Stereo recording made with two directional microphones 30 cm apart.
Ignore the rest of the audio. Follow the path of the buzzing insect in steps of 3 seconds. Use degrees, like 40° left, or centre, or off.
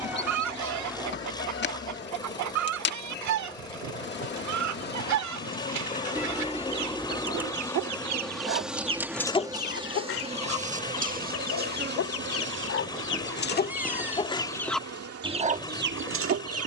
40° left, 30° left, 10° left, 20° right, 40° right, 50° right.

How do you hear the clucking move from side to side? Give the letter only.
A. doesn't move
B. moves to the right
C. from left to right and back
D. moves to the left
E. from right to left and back
E.